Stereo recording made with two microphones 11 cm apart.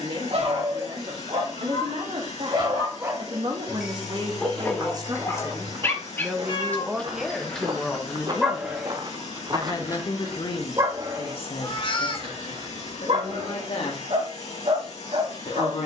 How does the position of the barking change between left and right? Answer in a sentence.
In this clip you hear the barking move from right to left and back again.